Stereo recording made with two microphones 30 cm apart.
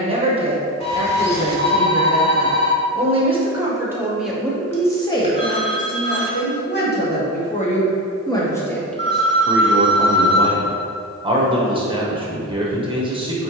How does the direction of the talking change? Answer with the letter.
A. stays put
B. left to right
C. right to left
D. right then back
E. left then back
E.